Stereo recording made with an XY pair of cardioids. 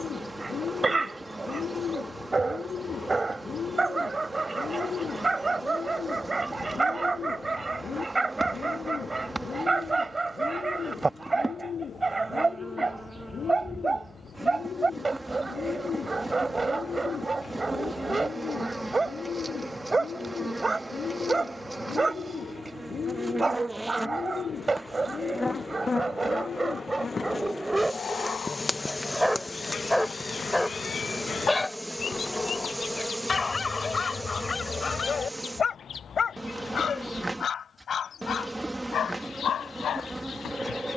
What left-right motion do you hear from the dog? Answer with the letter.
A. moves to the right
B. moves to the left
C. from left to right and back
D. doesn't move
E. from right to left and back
B.